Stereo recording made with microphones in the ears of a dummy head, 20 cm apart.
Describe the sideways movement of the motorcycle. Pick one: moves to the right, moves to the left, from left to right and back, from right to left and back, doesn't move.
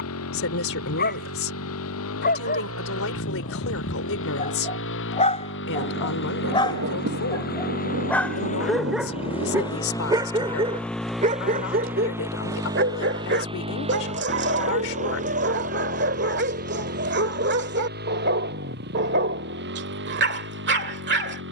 moves to the right.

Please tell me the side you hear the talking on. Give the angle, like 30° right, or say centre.
70° left.